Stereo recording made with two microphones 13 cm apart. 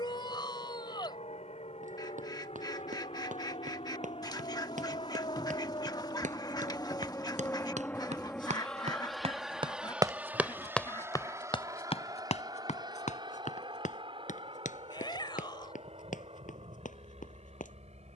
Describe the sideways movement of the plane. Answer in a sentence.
You can hear the plane move to the right.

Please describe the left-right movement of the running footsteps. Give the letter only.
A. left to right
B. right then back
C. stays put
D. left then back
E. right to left
E.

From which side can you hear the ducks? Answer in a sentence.
You can hear the ducks on the left.